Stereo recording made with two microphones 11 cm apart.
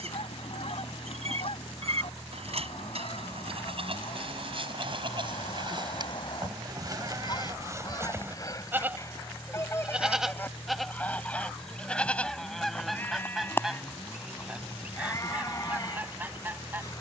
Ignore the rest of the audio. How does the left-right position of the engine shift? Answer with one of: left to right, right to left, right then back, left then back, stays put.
stays put.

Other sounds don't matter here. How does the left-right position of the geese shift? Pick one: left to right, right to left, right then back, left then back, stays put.
left to right.